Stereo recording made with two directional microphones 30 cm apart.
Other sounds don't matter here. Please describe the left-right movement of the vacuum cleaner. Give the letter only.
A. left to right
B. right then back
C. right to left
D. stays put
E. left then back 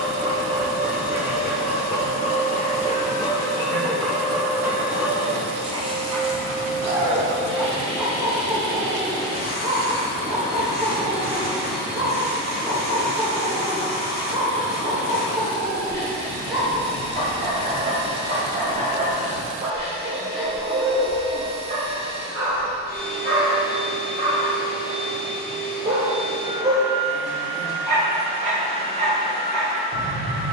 D.